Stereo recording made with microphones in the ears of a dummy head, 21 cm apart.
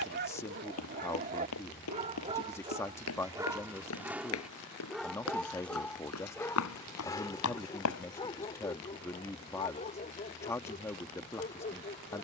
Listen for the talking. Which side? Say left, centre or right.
centre.